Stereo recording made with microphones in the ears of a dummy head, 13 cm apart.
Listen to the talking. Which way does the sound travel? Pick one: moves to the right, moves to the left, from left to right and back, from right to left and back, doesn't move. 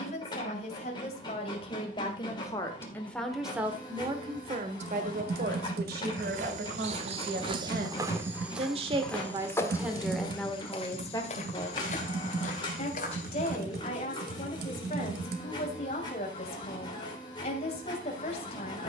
from left to right and back.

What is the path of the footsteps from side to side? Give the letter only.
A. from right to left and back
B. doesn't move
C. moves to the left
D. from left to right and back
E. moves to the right
C.